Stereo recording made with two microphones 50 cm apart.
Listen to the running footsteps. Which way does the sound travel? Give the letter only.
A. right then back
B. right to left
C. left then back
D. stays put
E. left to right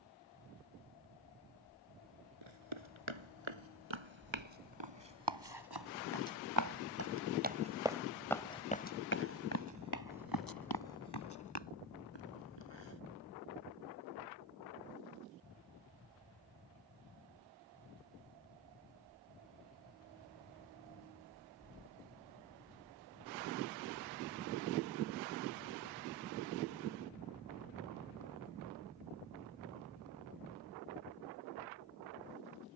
B.